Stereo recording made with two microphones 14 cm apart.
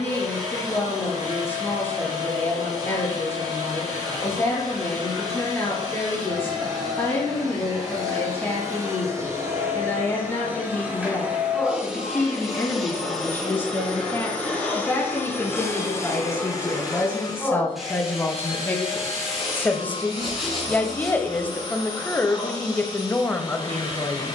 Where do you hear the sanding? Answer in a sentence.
In this clip you hear the sanding in the centre.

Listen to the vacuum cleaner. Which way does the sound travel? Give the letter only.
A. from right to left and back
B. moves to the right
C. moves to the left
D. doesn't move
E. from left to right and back
C.